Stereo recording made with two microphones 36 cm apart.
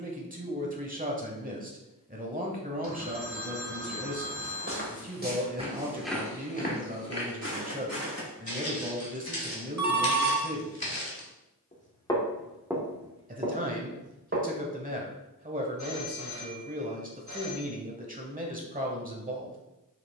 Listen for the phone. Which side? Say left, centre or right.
right.